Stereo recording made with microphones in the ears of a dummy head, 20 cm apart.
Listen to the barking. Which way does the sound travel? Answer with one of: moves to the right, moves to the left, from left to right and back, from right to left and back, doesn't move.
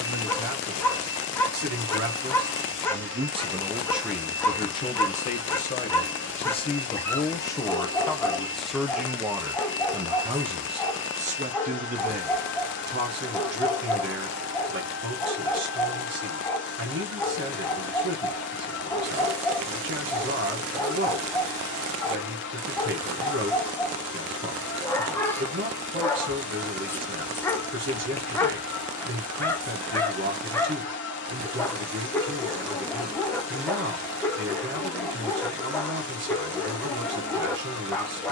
doesn't move.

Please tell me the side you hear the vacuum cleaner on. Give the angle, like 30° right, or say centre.
50° left.